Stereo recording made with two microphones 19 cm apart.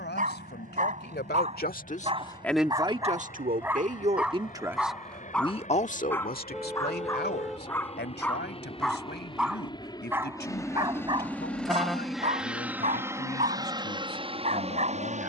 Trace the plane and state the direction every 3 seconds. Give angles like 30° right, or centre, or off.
60° left, 50° left, 40° left, 20° left, 20° right.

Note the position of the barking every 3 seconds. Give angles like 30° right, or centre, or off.
40° right, centre, 10° left, 20° right, 40° right.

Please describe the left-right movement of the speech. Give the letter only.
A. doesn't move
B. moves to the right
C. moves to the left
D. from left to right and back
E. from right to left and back
D.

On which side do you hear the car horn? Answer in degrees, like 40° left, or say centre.
centre.